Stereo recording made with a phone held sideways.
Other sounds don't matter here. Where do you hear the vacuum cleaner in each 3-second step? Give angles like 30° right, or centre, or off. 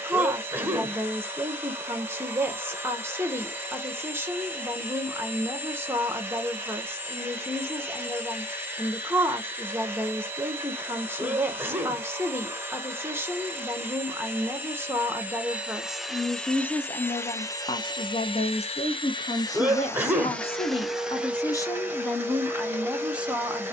20° right, 20° right, 20° right, 20° right, 20° right, 10° left, 20° left, 10° right.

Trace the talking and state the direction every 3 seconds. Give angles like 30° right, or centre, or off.
20° right, 20° right, 20° right, 20° right, 20° right, 10° left, 50° left, 10° left.